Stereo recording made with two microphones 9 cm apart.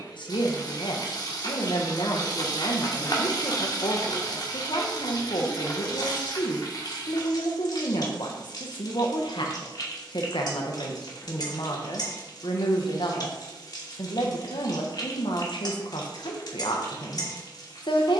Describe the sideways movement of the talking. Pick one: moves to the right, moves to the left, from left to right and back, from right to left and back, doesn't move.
doesn't move.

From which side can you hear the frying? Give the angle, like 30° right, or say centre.
50° left.